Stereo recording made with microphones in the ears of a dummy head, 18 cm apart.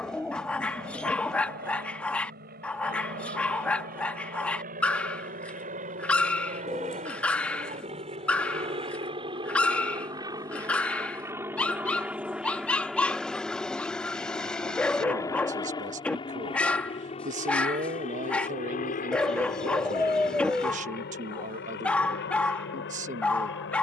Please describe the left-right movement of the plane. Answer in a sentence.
You can hear the plane move from right to left.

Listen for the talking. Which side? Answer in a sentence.
In this clip you hear the talking on the right.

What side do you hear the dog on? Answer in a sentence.
You can hear the dog in the centre.